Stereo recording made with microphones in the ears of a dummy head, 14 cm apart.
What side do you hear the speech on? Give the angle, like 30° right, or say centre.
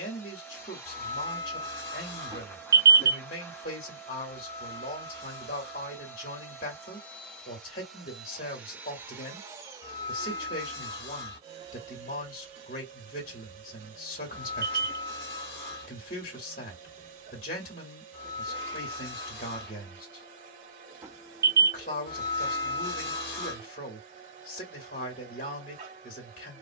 60° left.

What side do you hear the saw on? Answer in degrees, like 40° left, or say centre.
60° left.